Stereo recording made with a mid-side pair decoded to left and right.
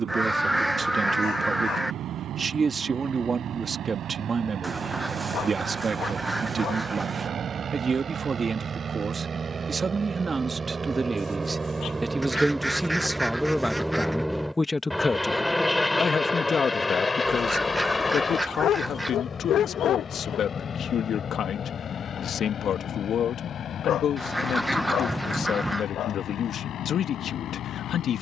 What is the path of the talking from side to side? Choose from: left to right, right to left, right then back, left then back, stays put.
right to left.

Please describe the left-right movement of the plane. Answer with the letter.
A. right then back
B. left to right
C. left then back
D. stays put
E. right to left
E.